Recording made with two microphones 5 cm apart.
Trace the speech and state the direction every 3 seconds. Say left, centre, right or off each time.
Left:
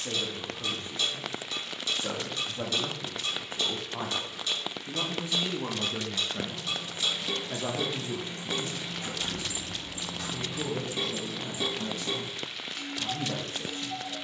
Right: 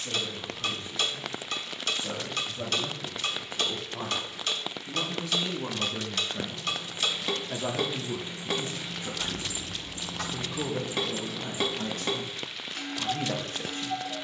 left, left, centre, right, right.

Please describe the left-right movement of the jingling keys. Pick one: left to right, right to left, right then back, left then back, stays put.
left to right.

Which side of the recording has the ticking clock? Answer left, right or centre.
right.